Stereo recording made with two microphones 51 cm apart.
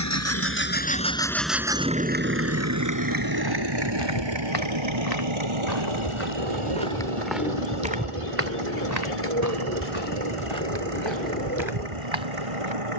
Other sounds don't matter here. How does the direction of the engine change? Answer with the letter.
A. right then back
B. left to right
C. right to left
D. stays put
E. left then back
B.